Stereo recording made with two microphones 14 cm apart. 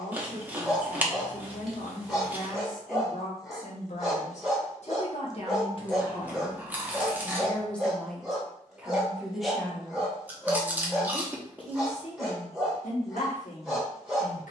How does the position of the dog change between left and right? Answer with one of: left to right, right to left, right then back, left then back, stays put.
stays put.